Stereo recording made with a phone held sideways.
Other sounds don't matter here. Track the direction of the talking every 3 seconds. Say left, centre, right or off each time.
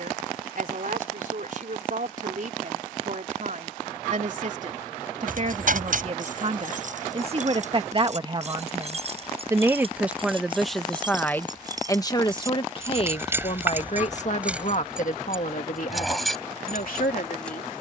right, right, right, centre, left, left.